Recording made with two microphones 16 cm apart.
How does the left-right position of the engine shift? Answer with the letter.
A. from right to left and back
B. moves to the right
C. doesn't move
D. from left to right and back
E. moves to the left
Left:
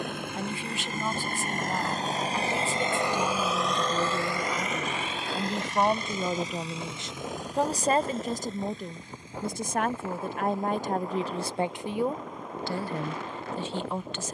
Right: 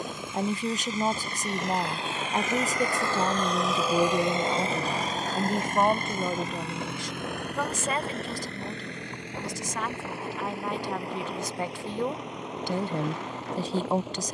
B.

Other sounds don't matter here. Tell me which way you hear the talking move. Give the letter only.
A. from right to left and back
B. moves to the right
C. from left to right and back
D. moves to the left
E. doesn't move
A.